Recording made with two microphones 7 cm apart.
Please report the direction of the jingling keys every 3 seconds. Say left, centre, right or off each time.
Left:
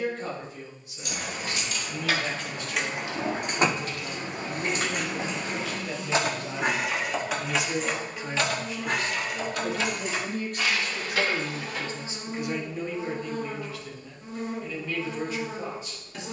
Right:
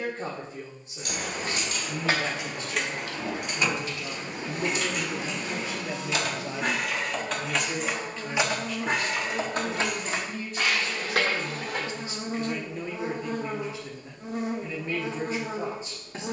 right, left, centre, right, off, off.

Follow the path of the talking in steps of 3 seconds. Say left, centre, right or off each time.
right, right, centre, left, centre, right.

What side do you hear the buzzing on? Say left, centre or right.
right.